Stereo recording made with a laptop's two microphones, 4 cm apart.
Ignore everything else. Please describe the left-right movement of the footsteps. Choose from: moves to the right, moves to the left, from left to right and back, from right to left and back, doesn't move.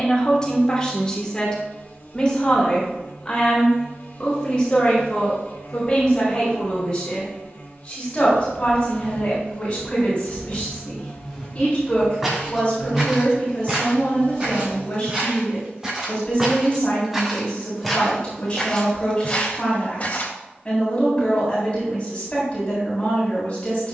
from left to right and back.